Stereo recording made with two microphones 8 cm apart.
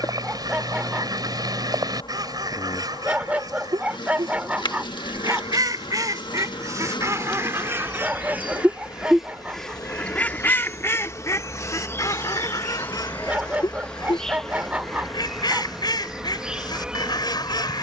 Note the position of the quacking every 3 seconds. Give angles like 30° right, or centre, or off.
60° right, 60° right, 30° right, 20° left, 60° left, 60° left.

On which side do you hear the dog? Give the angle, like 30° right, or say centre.
20° right.